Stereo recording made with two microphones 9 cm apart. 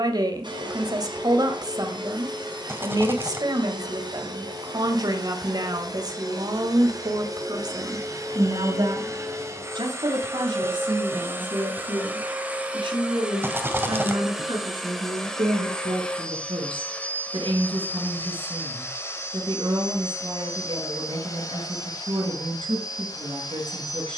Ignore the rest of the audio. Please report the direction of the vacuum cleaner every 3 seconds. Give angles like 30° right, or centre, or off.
60° right, 50° right, 40° right, 30° right, 10° right, 10° left, 30° left, 50° left.